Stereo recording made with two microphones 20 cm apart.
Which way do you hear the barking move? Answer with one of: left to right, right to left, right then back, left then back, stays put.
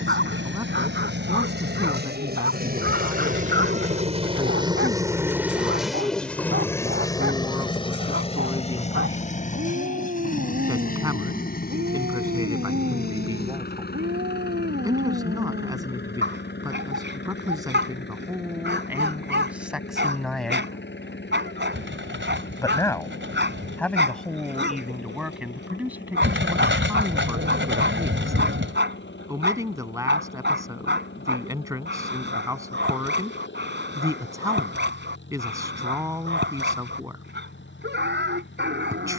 stays put.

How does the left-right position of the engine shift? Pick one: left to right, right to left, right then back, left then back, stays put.
right to left.